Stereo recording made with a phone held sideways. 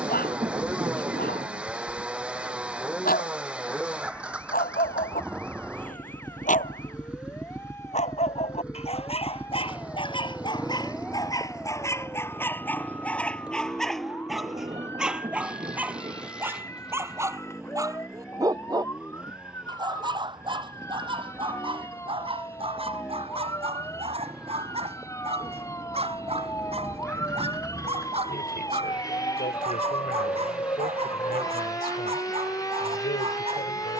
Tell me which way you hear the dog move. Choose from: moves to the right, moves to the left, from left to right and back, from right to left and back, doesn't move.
moves to the right.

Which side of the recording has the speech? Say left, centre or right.
left.